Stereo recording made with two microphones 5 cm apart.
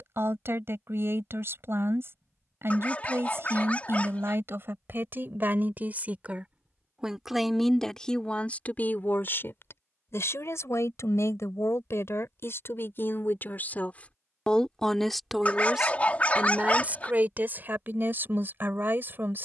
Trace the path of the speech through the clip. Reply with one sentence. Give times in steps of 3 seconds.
In this clip you hear the speech on the right from 0 s, in the centre from 6 s, on the left from 9 s and on the right from 15 s.